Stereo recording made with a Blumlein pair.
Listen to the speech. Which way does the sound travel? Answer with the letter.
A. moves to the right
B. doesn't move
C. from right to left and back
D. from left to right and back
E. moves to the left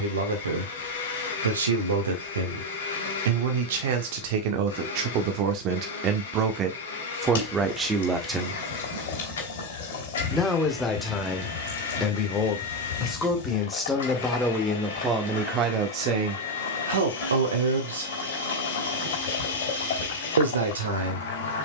C.